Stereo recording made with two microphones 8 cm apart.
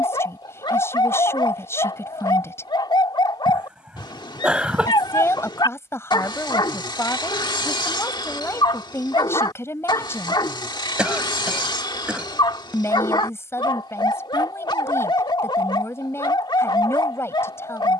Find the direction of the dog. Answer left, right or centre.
left.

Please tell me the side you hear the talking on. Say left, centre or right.
left.